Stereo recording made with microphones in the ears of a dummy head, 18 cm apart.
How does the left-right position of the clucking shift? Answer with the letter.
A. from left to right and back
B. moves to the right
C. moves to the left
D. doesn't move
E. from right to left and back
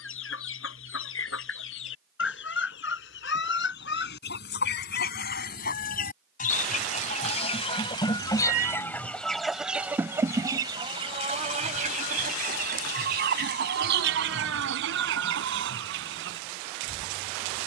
B.